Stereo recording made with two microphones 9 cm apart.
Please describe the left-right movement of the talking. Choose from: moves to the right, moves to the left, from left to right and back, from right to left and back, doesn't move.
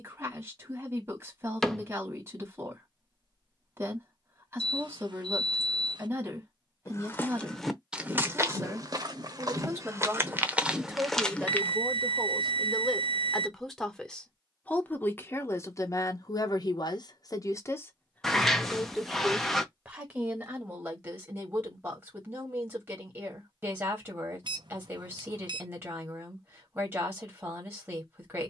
from right to left and back.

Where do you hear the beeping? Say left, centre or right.
right.